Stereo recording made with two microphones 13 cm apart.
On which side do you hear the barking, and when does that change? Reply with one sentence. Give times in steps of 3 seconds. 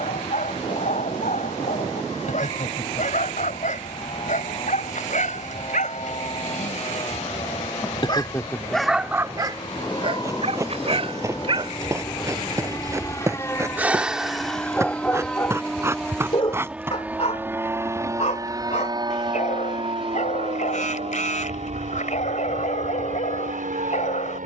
In this clip you hear the barking on the left from 0 s, on the right from 9 s, in the centre from 12 s and on the left from 15 s.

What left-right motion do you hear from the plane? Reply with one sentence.
In this clip you hear the plane travel towards the right.